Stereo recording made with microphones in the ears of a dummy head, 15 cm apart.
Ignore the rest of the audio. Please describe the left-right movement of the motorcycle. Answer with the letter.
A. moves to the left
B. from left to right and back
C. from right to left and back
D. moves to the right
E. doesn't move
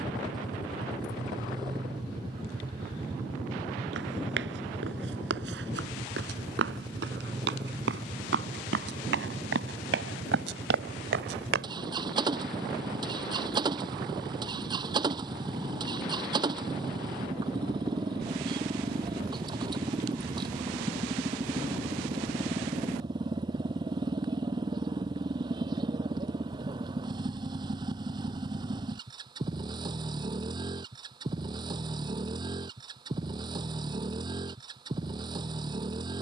E.